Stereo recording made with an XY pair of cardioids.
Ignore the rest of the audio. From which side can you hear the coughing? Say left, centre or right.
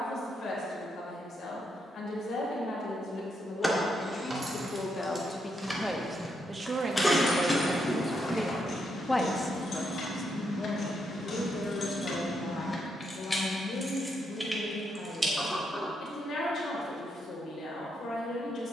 centre.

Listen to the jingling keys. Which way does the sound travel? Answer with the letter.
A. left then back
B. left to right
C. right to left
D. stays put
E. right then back
A.